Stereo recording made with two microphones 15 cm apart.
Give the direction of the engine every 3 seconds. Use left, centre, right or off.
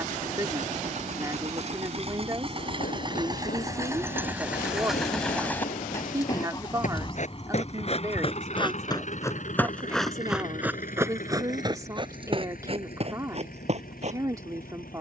right, centre, left, left, left.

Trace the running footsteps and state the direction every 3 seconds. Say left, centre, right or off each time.
left, left, left, centre, right.